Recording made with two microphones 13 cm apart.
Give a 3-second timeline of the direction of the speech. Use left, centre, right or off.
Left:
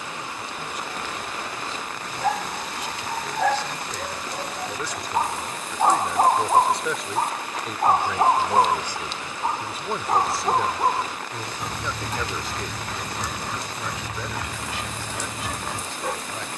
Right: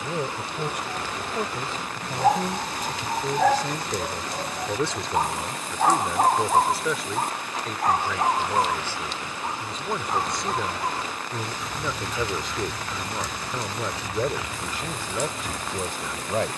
right, right, centre, centre, right, right.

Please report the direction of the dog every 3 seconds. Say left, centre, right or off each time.
right, centre, left, left, left, left.